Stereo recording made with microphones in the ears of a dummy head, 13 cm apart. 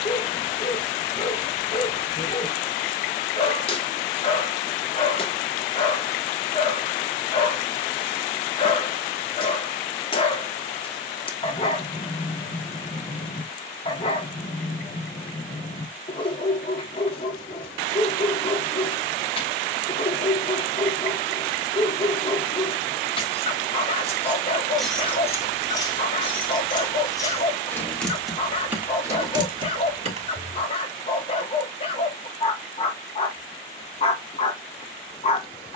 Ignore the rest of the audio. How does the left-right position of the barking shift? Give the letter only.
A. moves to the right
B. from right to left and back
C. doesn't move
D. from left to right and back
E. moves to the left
C.